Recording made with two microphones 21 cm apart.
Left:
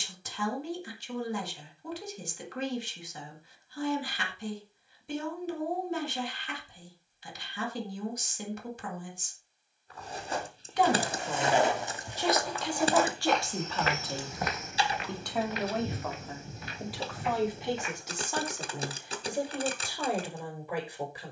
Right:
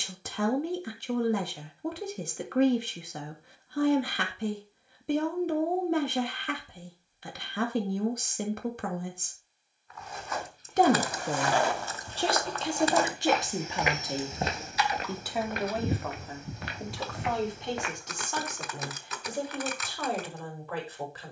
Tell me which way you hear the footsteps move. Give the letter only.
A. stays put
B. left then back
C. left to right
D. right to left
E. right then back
C.